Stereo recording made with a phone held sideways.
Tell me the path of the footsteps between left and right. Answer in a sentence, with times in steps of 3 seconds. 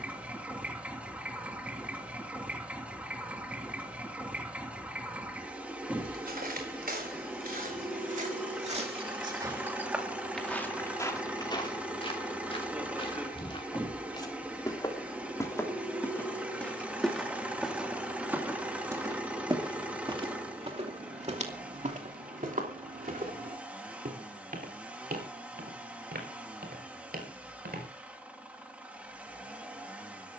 In this clip you hear the footsteps not at all from 0 s, on the right from 6 s, in the centre from 9 s, on the left from 12 s, in the centre from 15 s and on the right from 18 s.